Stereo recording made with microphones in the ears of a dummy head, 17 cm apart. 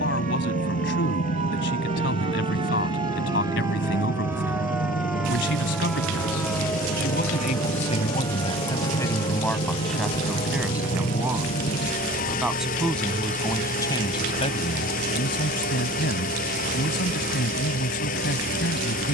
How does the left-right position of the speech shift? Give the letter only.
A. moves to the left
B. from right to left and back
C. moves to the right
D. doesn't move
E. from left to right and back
E.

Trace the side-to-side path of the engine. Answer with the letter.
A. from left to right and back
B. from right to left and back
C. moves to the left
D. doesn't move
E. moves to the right
D.